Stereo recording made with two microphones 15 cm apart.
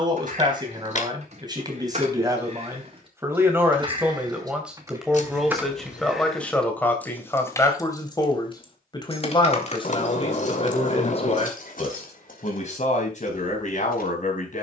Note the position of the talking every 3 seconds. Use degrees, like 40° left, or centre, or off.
30° right, 10° right, 10° left, 40° left, 50° left.